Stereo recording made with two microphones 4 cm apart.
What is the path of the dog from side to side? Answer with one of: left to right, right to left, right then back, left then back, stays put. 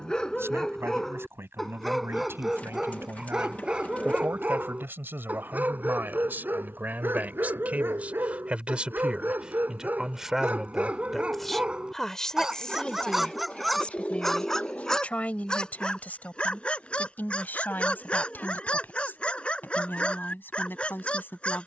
right then back.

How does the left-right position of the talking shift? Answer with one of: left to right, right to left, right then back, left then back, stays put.
right to left.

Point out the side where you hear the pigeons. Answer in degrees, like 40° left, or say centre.
40° left.